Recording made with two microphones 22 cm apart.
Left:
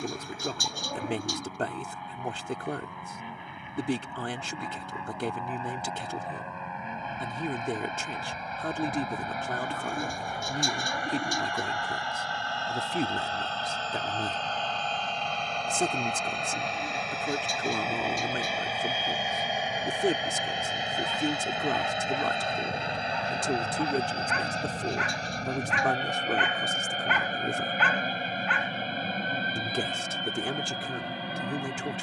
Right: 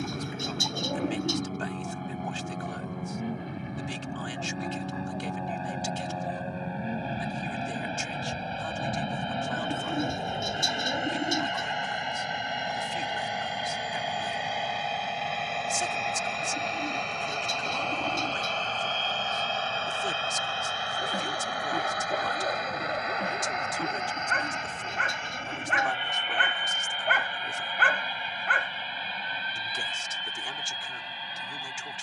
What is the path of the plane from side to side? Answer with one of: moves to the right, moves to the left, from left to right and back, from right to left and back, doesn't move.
moves to the left.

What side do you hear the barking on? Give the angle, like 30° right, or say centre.
50° right.